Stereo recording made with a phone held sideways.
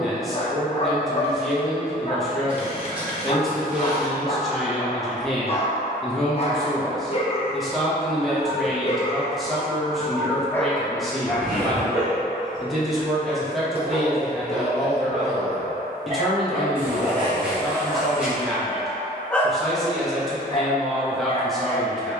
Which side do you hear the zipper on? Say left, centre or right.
centre.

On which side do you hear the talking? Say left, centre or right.
centre.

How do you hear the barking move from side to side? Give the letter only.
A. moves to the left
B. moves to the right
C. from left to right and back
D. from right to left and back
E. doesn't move
C.